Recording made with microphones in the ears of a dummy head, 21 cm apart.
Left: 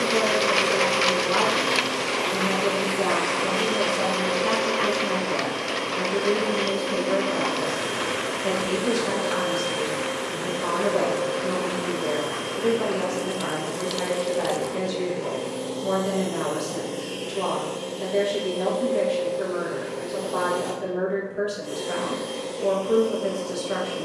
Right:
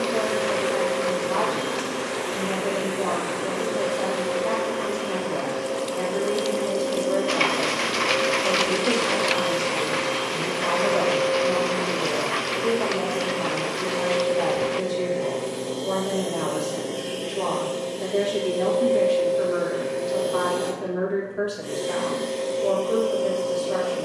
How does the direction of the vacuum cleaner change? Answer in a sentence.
In this clip you hear the vacuum cleaner move to the right.